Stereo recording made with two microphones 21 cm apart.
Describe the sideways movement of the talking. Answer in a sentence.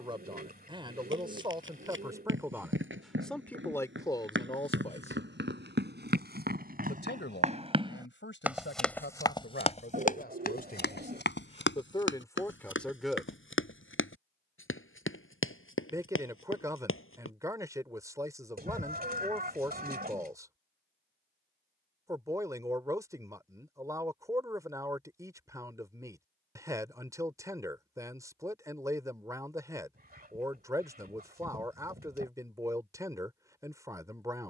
In this clip you hear the talking move from right to left and back again.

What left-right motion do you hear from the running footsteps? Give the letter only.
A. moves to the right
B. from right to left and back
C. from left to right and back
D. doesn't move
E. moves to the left
E.